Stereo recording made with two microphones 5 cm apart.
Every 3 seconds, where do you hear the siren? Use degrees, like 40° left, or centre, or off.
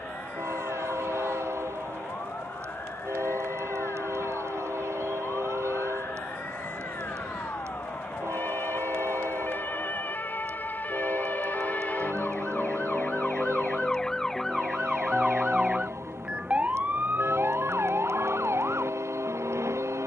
60° left, 50° left, 50° left, 40° left, 20° left, 20° right, 60° right.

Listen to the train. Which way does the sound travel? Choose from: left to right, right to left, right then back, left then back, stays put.
stays put.